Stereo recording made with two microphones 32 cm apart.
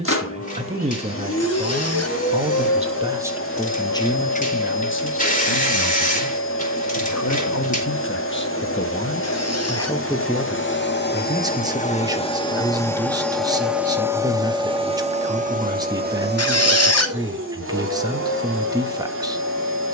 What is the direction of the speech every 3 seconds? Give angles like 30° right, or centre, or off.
20° right, 20° left, 40° left, centre, 10° right, 10° right, 10° right.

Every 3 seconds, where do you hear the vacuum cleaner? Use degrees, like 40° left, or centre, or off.
40° left, 40° left, 40° left, 40° left, centre, 30° right, 40° right.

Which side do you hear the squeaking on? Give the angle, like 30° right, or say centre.
50° left.